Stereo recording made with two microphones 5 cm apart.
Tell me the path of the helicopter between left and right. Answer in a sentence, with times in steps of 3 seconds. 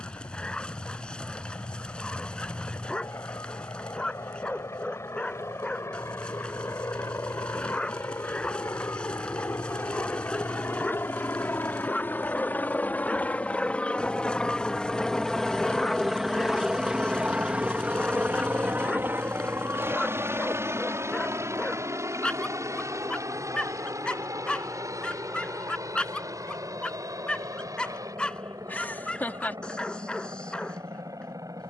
You can hear the helicopter on the left from 0 s, in the centre from 15 s and on the right from 18 s.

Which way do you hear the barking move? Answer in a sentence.
In this clip you hear the barking stay put.